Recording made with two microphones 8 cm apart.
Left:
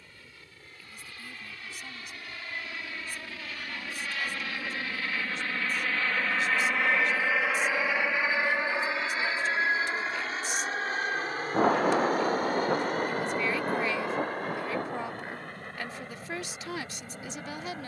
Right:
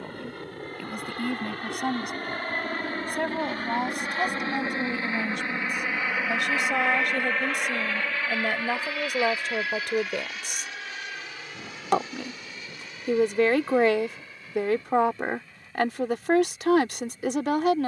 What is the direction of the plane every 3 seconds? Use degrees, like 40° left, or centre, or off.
60° right, 30° right, 10° left, 30° left, 50° left, 50° left.